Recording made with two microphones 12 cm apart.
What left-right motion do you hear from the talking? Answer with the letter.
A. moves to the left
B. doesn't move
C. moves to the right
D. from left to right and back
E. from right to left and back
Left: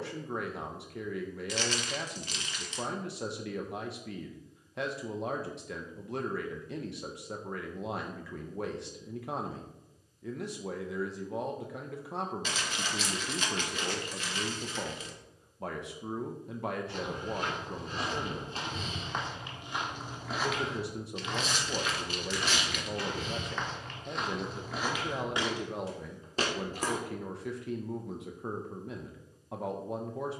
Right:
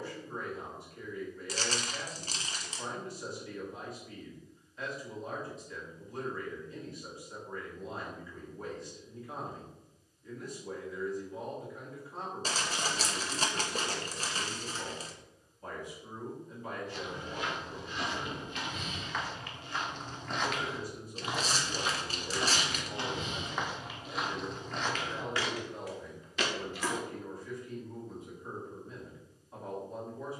B.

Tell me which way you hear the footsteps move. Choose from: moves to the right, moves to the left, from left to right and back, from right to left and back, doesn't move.
from left to right and back.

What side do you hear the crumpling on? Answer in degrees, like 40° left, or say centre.
40° right.